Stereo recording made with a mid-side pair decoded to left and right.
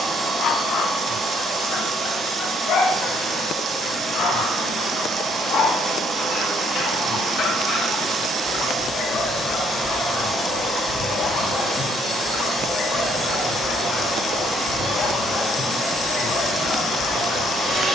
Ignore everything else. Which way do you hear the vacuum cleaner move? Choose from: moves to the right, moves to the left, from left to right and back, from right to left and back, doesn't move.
doesn't move.